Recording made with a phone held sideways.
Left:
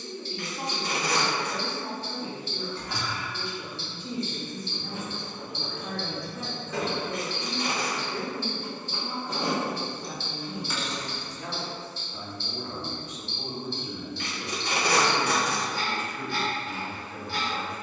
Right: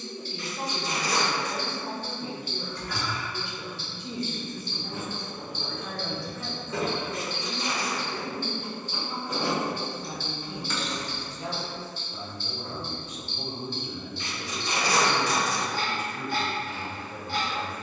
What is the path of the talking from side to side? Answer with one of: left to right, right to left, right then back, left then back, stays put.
left then back.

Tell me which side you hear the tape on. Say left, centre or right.
left.